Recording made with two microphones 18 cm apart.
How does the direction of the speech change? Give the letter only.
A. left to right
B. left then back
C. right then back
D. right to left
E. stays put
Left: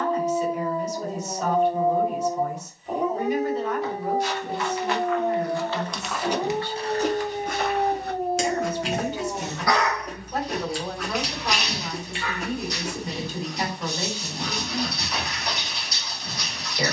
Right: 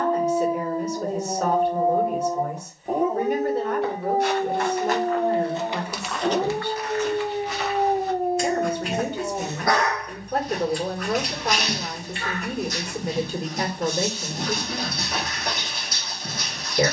E.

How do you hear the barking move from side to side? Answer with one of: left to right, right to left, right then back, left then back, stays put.
stays put.